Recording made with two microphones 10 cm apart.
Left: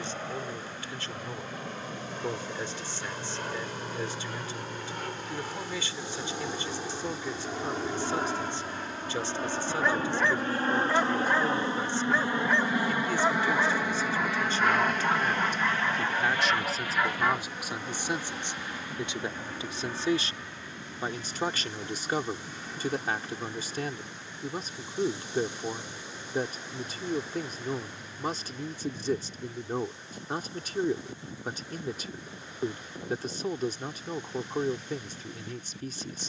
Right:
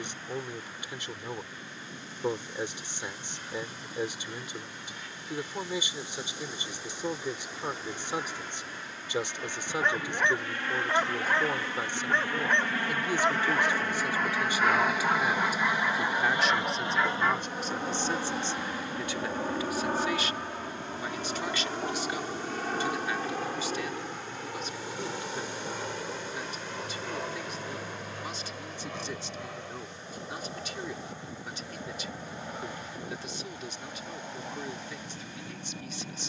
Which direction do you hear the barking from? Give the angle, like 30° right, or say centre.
centre.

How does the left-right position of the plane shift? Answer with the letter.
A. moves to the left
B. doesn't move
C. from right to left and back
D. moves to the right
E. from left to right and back
D.